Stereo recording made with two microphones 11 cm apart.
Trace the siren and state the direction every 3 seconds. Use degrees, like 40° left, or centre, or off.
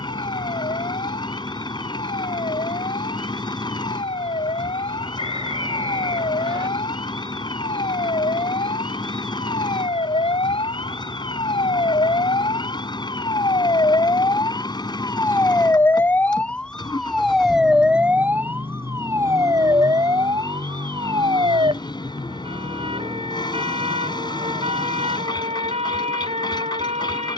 80° left, 80° left, 70° left, 60° left, 40° left, 10° left, 30° right, 50° right, 60° right.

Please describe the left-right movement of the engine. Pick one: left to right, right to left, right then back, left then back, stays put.
stays put.